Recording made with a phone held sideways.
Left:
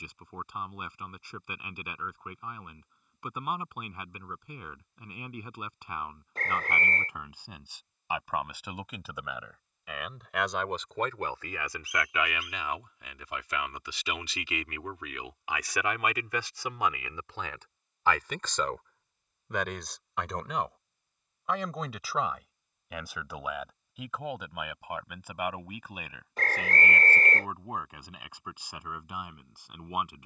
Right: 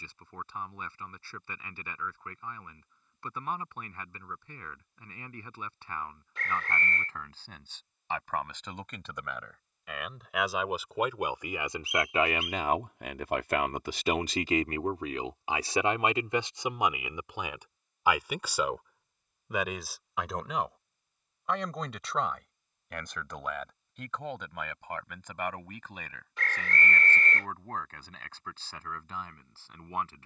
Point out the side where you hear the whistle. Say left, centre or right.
left.